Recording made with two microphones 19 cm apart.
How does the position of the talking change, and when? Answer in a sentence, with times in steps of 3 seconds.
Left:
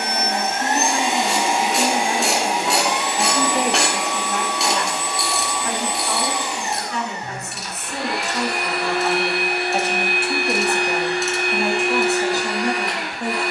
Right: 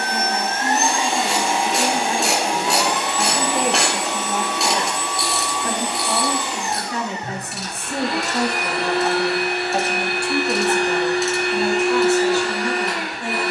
You can hear the talking on the left from 0 s, in the centre from 3 s, on the right from 6 s, in the centre from 9 s and on the left from 12 s.